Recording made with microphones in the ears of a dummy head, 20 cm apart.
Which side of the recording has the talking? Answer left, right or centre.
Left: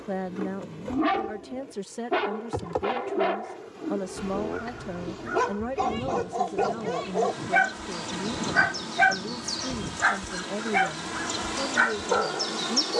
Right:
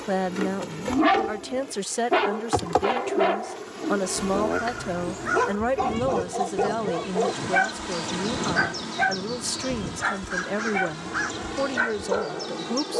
right.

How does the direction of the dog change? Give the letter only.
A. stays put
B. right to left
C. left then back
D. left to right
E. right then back
B.